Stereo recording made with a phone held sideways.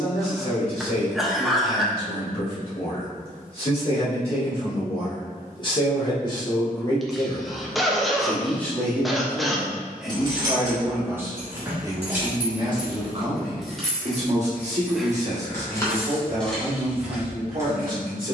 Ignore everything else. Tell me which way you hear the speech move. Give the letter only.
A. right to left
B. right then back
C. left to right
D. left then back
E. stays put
C.